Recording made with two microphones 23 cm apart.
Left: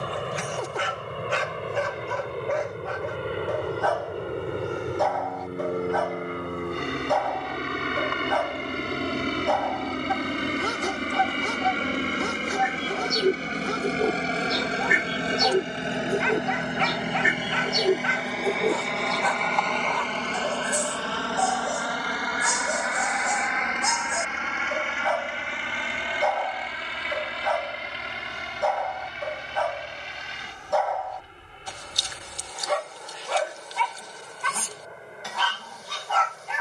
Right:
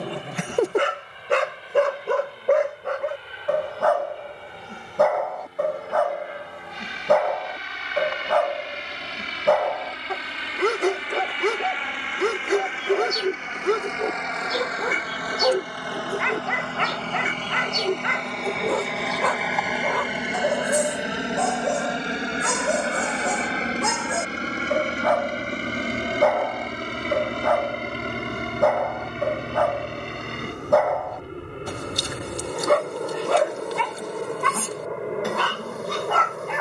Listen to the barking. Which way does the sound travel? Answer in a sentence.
In this clip you hear the barking stay put.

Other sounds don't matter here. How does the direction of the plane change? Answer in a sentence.
In this clip you hear the plane move from left to right.